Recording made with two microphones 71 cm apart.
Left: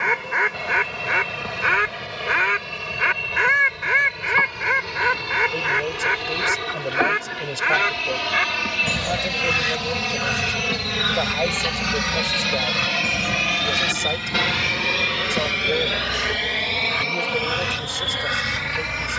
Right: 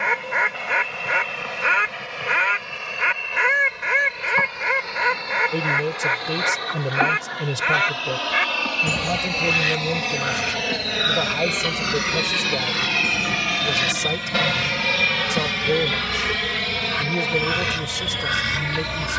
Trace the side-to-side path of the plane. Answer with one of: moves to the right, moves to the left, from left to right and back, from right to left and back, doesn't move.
moves to the right.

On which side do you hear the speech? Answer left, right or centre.
right.